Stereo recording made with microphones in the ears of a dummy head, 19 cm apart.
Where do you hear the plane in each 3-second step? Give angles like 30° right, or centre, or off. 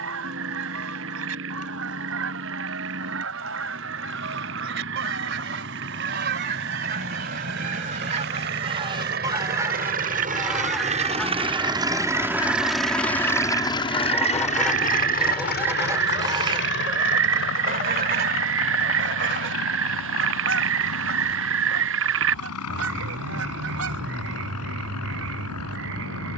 80° right, 70° right, 70° right, 40° right, 10° left, 50° left, 70° left, 70° left, 80° left.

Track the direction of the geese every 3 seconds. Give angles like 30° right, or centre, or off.
70° right, 60° right, 40° right, centre, 10° left, 20° right, 50° right, 70° right, 70° right.